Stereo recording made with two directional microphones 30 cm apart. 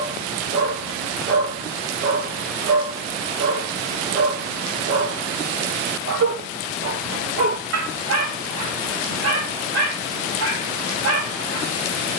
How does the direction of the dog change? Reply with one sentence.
In this clip you hear the dog stay in one place.